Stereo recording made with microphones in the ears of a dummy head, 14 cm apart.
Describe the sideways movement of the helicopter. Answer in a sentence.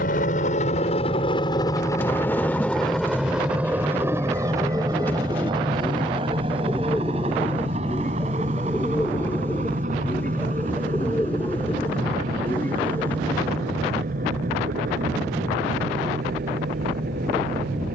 In this clip you hear the helicopter go from the left side to the right.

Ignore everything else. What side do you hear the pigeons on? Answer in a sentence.
You can hear the pigeons in the centre.